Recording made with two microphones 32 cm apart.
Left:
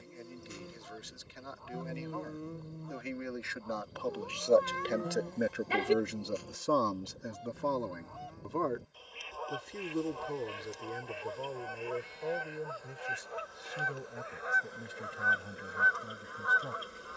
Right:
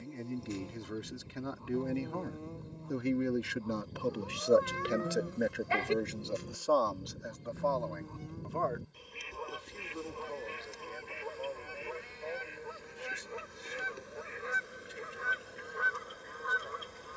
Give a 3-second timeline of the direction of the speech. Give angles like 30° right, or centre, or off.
60° right, 20° right, 40° left, 60° left, 70° left, 70° left.